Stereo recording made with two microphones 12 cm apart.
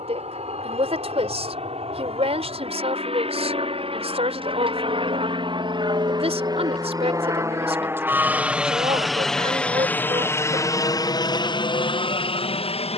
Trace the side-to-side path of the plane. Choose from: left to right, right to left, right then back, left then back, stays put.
right to left.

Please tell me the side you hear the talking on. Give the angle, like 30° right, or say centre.
50° right.